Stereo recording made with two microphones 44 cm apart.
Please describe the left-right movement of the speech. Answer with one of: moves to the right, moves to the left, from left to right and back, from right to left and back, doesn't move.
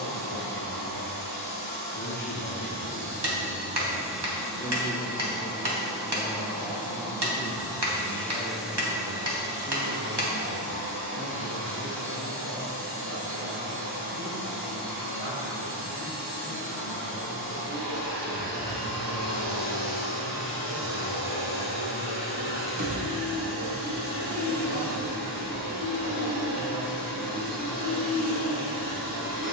moves to the right.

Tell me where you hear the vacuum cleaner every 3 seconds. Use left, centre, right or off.
right, centre, centre, right, right, right, right, right, right, right.